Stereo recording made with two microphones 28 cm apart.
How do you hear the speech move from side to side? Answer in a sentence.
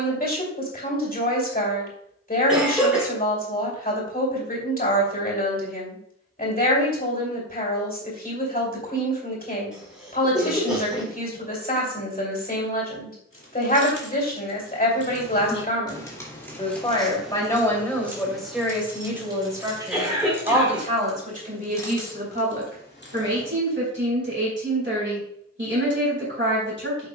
You can hear the speech go from the left side to the right.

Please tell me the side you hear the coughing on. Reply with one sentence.
You can hear the coughing in the centre.